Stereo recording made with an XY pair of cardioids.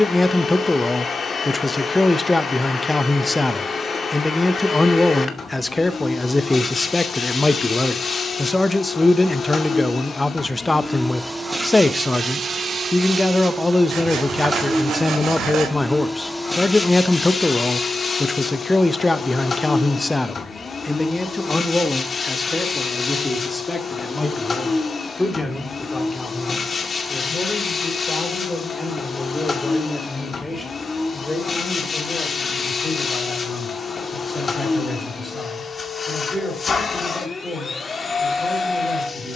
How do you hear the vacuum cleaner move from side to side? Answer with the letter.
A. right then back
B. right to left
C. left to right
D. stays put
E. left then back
A.